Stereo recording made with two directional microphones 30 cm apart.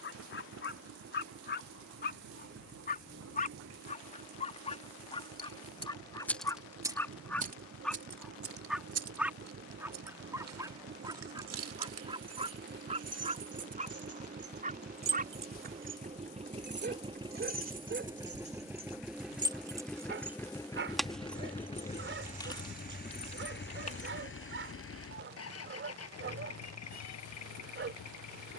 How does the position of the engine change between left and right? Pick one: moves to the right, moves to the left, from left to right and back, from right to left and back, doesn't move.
moves to the left.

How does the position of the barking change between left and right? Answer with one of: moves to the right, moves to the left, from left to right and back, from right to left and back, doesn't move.
moves to the right.